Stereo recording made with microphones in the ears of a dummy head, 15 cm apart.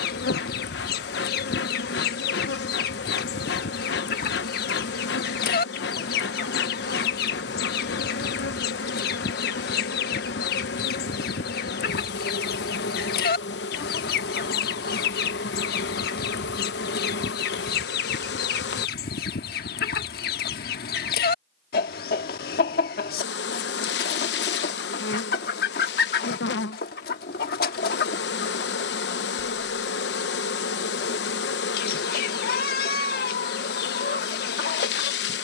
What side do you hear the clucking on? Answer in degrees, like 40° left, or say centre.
60° left.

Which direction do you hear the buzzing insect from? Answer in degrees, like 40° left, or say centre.
70° left.